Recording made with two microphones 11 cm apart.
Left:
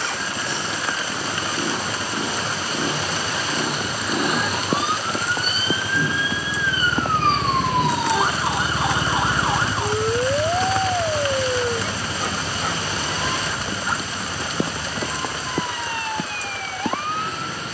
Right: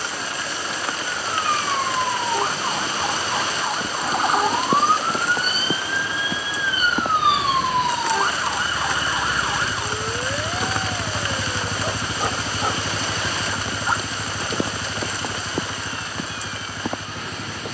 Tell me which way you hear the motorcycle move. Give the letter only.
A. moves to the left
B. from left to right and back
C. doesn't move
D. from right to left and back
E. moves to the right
E.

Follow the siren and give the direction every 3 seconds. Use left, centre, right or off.
right, right, centre, left, left, left.